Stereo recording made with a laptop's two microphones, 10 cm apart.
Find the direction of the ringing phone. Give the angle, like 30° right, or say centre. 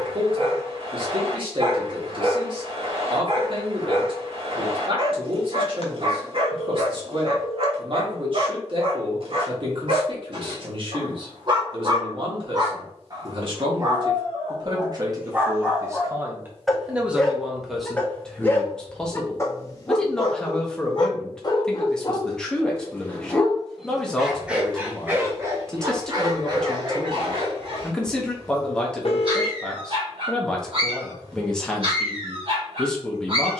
60° left.